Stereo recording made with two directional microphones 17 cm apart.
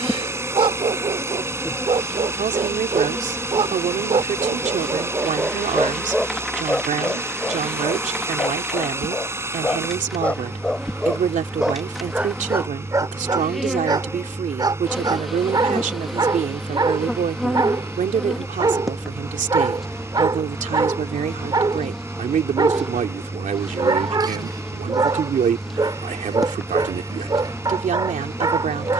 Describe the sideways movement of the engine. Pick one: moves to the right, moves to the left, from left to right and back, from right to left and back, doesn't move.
doesn't move.